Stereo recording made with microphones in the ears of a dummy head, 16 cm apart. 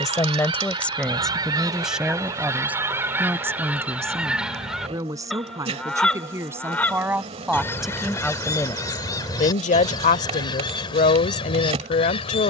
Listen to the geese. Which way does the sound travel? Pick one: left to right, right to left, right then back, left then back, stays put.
right to left.